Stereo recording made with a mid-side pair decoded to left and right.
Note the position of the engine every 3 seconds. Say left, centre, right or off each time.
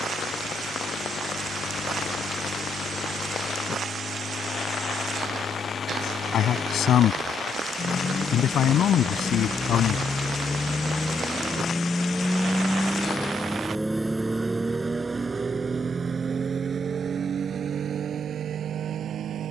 left, left, left, left, centre, right, right.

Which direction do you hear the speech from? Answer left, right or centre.
left.